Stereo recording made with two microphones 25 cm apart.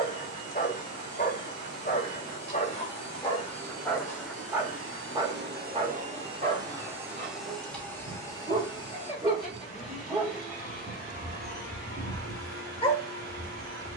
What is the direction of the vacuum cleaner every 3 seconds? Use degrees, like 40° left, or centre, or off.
80° right, 60° right, centre, 30° left, 40° left.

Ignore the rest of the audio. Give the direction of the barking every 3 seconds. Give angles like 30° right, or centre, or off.
30° left, centre, 30° right, centre, 20° left.